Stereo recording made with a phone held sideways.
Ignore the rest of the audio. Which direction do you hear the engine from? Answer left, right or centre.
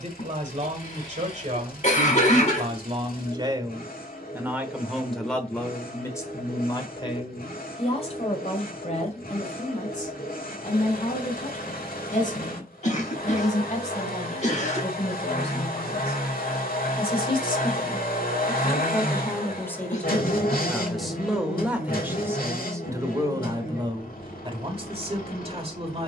left.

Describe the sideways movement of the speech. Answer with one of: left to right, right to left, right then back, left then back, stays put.
left then back.